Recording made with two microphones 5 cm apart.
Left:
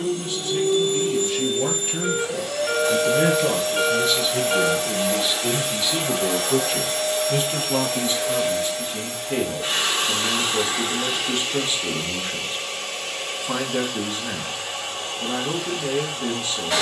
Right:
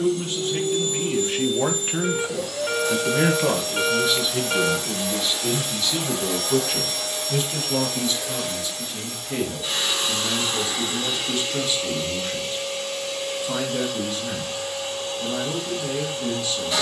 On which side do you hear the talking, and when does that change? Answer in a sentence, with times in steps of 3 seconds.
In this clip you hear the talking on the right from 0 s, in the centre from 3 s and on the left from 6 s.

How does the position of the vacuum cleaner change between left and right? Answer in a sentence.
In this clip you hear the vacuum cleaner stay in one place.